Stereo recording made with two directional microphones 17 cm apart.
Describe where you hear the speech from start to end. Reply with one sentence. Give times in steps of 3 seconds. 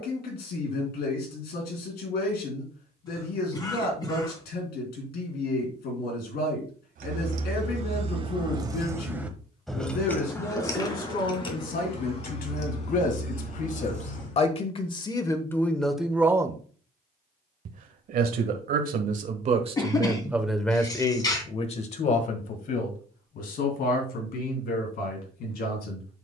You can hear the speech on the left from 0 s, in the centre from 15 s, on the right from 18 s and on the left from 21 s.